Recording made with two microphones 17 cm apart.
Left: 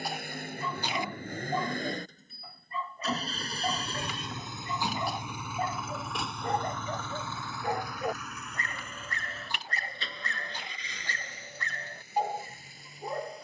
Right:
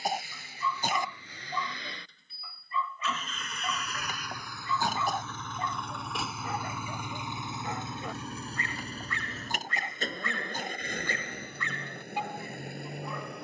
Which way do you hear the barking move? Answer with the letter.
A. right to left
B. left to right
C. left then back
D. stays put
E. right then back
D.